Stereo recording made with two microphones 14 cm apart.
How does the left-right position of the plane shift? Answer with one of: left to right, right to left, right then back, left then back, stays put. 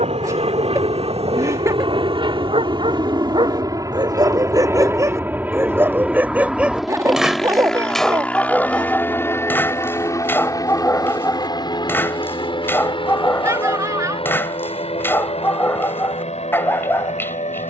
right to left.